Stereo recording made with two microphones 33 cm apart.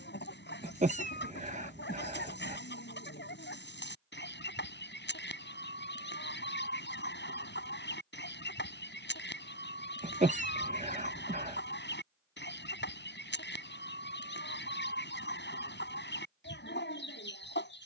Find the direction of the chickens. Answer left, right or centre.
left.